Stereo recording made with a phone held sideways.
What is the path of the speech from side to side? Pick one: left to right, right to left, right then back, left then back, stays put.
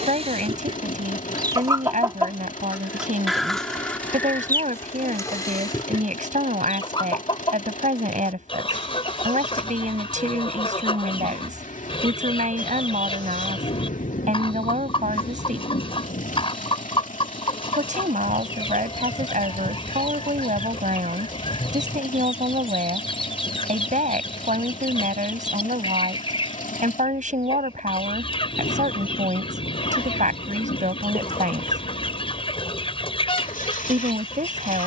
stays put.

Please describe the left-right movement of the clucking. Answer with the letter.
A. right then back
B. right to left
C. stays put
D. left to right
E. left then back
B.